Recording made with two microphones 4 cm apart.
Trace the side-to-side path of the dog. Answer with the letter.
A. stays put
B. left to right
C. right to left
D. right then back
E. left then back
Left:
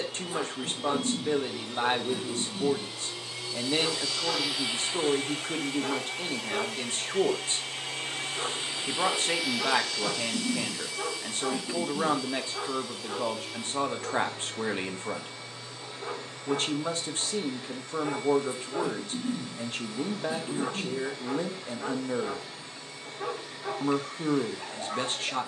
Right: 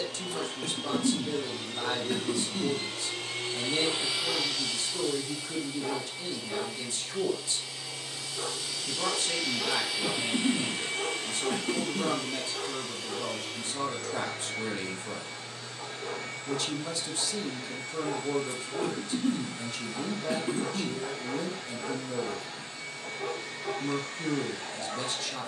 A.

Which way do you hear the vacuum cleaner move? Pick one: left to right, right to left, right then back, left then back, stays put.
left then back.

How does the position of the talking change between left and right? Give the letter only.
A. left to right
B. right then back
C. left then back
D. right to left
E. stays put
E.